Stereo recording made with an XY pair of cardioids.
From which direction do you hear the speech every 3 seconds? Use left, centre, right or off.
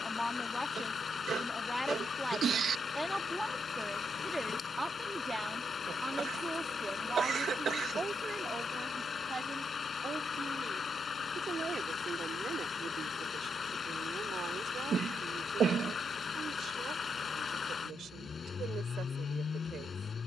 centre, centre, right, right, right, right, right.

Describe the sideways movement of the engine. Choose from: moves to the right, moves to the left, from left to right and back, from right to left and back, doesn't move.
doesn't move.